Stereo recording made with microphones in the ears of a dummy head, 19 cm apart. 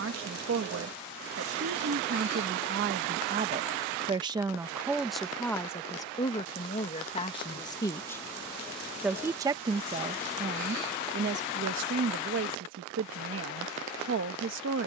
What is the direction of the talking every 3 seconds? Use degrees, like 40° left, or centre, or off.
60° right, 10° right, 20° left, 30° right, 60° right.